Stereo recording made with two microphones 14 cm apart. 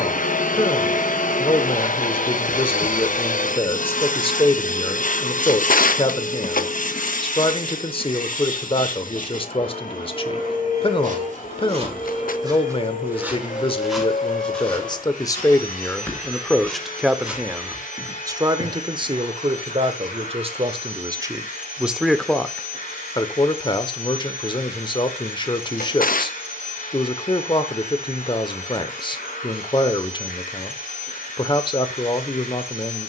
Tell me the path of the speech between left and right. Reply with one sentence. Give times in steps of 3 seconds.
In this clip you hear the speech on the left from 0 s, in the centre from 15 s, on the right from 18 s, in the centre from 21 s and on the left from 24 s.